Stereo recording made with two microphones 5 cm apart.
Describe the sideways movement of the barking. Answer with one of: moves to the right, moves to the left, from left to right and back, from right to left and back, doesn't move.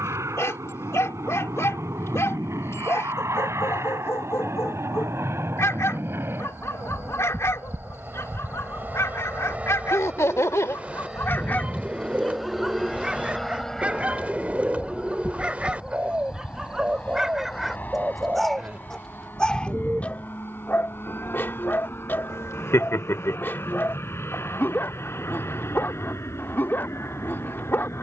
from left to right and back.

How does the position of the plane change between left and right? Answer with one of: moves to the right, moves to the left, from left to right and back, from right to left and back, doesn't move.
moves to the left.